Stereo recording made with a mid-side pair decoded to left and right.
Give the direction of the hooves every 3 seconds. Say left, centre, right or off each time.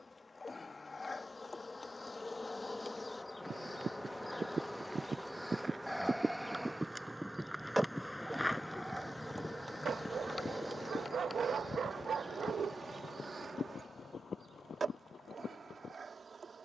off, right, centre, left, left, left.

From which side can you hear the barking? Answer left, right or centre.
right.